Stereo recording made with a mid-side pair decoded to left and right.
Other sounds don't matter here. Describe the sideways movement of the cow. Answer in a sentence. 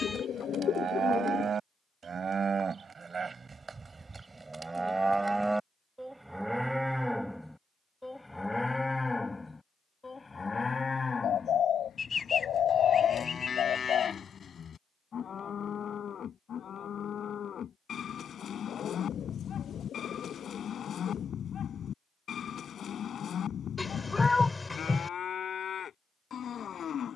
You can hear the cow travel towards the left.